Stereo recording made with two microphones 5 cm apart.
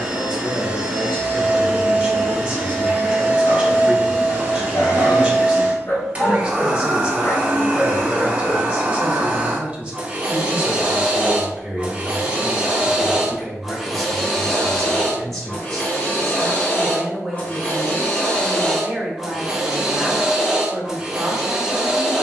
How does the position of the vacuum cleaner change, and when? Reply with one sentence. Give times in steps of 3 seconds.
You can hear the vacuum cleaner on the right from 0 s, in the centre from 12 s, on the left from 15 s and in the centre from 18 s.